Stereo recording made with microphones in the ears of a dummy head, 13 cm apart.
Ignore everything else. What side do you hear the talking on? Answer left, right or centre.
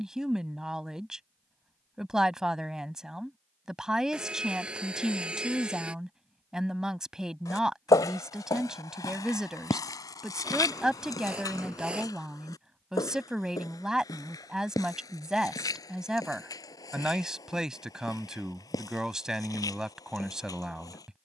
centre.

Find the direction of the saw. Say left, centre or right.
centre.